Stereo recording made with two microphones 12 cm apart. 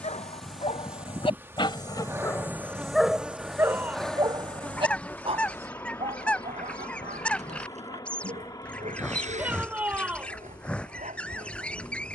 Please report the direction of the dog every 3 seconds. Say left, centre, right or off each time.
left, right, right, right.